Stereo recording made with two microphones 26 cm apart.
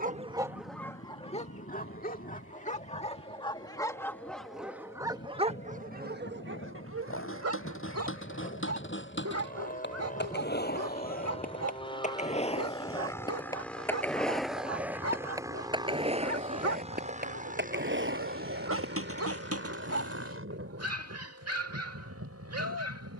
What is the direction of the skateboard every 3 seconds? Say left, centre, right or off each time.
off, off, left, left, centre, right, right, off.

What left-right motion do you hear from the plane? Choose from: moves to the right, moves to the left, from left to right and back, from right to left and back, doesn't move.
moves to the right.